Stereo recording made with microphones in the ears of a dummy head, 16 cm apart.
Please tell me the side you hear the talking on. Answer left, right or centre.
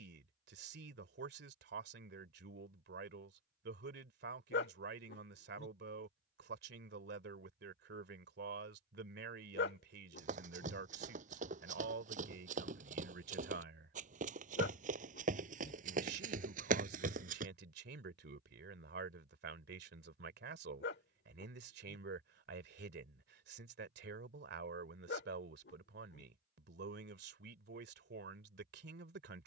right.